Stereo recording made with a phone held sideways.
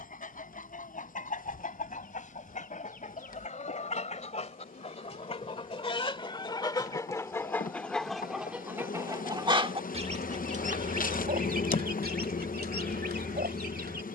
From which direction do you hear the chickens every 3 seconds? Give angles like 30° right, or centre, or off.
50° left, 40° left, 10° left, 50° right, 70° right.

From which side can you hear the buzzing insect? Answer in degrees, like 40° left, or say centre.
60° left.